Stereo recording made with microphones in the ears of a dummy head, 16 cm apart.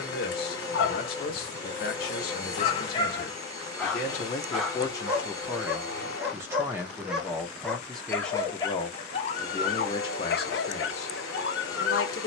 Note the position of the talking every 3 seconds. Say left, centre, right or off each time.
left, left, centre, left.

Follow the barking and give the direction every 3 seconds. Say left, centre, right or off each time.
left, centre, centre, left.